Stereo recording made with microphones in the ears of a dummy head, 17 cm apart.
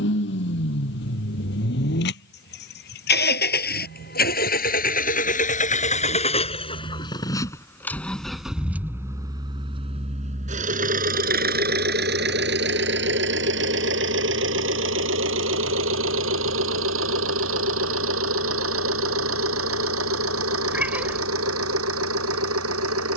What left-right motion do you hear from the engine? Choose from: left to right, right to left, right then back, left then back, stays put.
left to right.